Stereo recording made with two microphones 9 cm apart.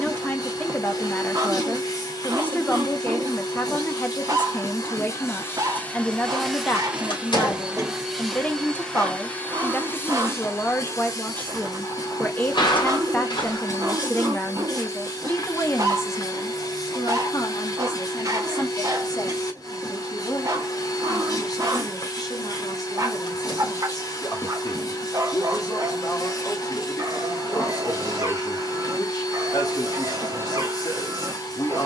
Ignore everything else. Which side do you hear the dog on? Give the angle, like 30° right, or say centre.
40° right.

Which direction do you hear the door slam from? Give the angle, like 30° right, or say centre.
70° left.